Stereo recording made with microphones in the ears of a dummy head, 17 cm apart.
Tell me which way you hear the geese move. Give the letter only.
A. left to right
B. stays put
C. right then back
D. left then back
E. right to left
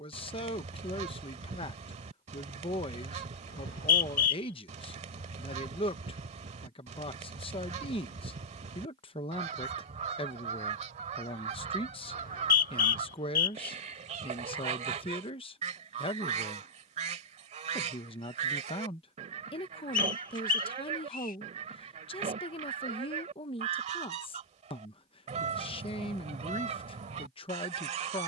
B.